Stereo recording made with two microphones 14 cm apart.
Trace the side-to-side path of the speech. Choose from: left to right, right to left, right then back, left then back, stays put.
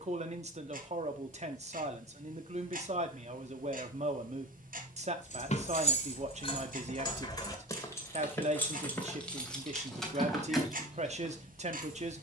stays put.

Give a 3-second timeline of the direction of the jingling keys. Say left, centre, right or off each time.
off, left, left, centre.